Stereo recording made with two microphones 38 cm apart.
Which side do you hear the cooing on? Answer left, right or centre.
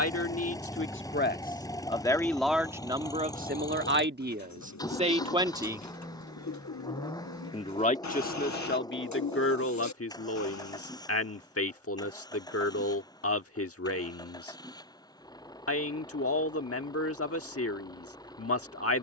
left.